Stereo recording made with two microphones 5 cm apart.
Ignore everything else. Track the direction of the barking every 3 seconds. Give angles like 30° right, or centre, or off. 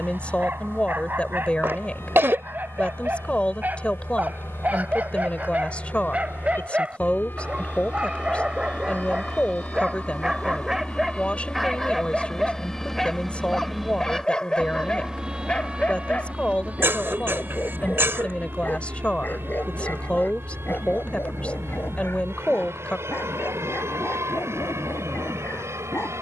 50° right, 40° right, 30° right, 10° right, 10° left, 30° left, 40° left, 60° left, 60° left.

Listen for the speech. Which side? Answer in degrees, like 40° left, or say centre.
30° left.